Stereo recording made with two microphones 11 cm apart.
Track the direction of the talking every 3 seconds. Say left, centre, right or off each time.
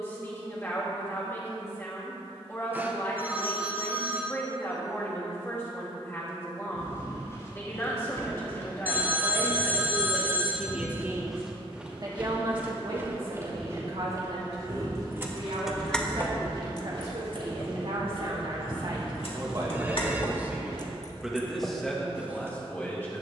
left, left, left, centre, right, right, right, centre.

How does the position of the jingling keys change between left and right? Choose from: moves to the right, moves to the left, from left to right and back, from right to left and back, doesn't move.
from right to left and back.